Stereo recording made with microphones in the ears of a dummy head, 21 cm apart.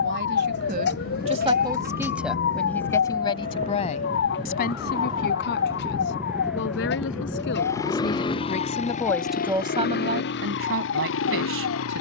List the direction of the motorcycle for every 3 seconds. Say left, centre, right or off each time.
right, right, centre, left.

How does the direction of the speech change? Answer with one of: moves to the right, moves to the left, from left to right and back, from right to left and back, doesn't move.
from right to left and back.